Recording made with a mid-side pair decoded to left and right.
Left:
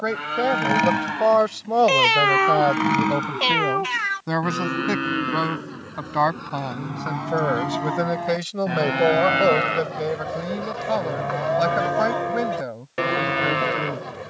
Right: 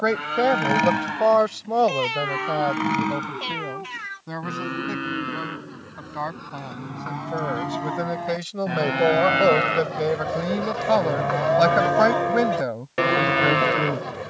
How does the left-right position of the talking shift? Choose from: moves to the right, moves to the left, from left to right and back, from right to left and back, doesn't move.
from right to left and back.